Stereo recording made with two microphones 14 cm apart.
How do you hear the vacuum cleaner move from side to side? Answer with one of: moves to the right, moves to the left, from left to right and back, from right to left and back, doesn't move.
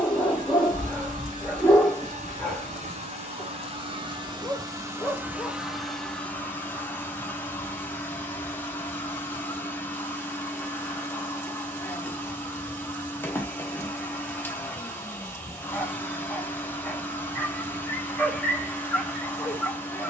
moves to the left.